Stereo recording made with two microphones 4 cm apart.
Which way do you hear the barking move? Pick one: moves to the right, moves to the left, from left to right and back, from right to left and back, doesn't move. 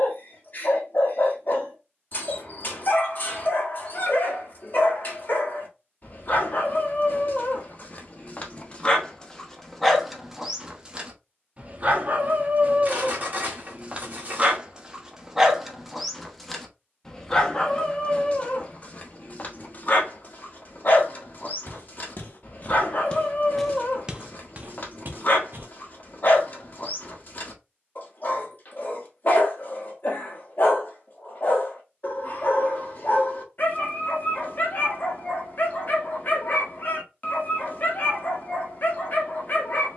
from left to right and back.